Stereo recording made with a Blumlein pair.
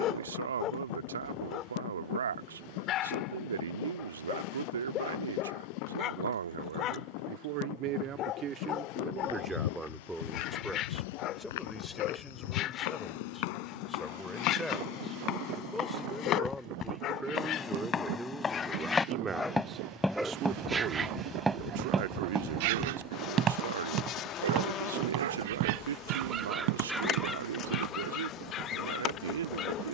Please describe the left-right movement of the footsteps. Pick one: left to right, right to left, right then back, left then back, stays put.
left to right.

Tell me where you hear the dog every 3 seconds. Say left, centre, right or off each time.
left, left, left, left, left, left, centre, right, right, left.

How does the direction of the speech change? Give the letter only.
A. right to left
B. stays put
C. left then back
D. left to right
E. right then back
C.